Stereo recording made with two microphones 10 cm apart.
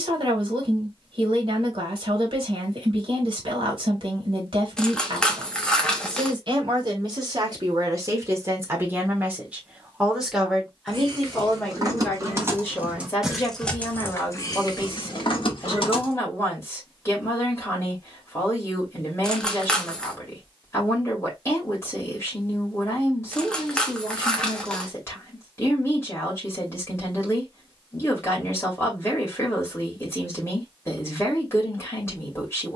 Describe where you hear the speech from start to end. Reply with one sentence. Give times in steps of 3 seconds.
In this clip you hear the speech on the right from 0 s, in the centre from 9 s and on the left from 12 s.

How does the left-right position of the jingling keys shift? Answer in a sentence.
In this clip you hear the jingling keys move from right to left.